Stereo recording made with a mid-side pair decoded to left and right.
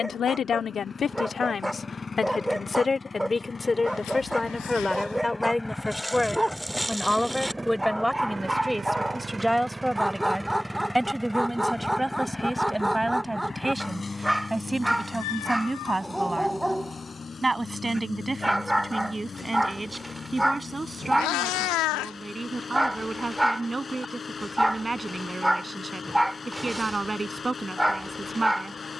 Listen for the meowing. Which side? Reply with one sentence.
You can hear the meowing on the left.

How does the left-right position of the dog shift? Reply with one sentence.
In this clip you hear the dog stay in one place.